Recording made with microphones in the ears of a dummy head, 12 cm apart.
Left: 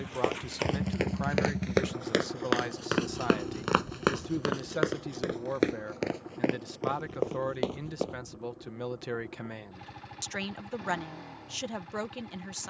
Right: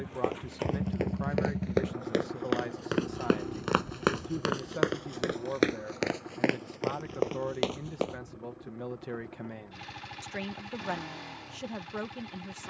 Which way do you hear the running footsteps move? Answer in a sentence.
In this clip you hear the running footsteps move to the right.